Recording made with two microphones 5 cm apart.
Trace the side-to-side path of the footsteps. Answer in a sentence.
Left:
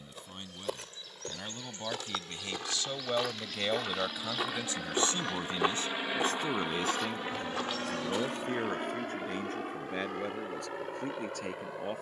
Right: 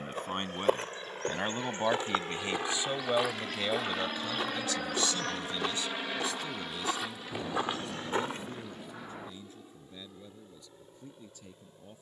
In this clip you hear the footsteps move from right to left and back again.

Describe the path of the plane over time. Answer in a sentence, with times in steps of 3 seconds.
In this clip you hear the plane on the right from 0 s and on the left from 6 s.